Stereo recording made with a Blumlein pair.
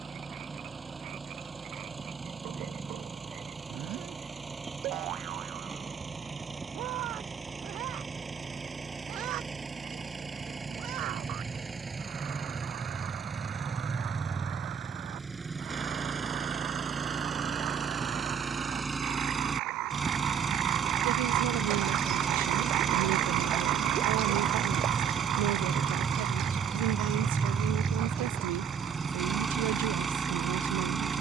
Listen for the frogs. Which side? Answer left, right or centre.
right.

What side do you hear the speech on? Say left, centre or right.
right.